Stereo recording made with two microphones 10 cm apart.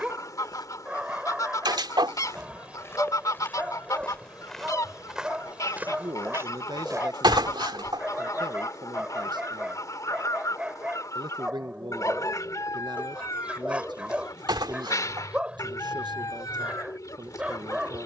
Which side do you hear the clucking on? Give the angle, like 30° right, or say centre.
40° left.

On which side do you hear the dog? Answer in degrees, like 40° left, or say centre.
10° right.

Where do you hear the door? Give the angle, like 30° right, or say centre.
50° right.